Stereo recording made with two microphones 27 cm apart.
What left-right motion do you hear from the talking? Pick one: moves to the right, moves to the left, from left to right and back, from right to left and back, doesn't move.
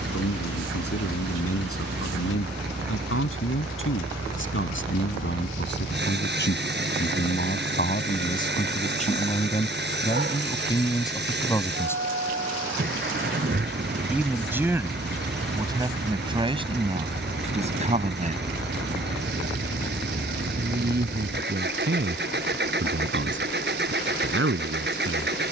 moves to the right.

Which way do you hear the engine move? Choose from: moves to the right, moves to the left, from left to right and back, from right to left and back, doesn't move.
doesn't move.